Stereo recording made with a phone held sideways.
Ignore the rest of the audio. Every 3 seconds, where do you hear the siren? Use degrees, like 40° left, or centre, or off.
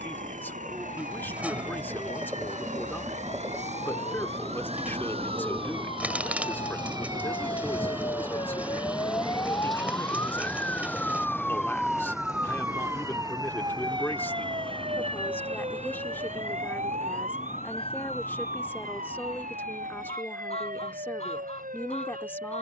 60° left, 60° left, 40° left, 20° left, 30° right, 60° right, 70° right, 80° right.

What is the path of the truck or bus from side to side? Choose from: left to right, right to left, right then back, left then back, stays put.
right to left.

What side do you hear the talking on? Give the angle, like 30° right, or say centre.
10° left.